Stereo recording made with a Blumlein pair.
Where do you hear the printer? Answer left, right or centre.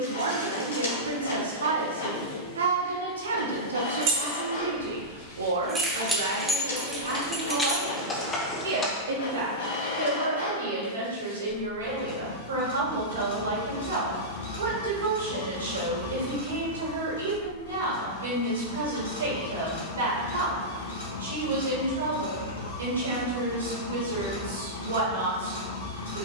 left.